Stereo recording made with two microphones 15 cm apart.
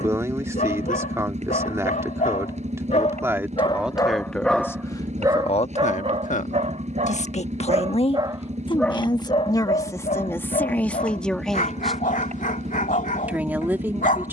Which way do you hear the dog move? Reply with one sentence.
You can hear the dog move from left to right and back again.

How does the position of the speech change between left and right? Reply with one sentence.
You can hear the speech go left and come back.